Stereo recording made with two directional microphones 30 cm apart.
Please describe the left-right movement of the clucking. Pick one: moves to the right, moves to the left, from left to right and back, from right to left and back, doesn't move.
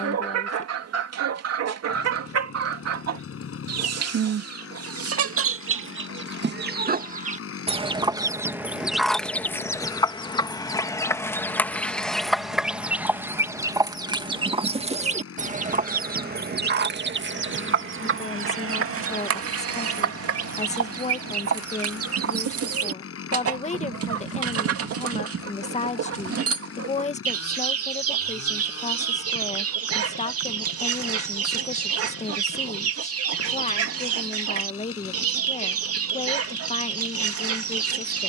from right to left and back.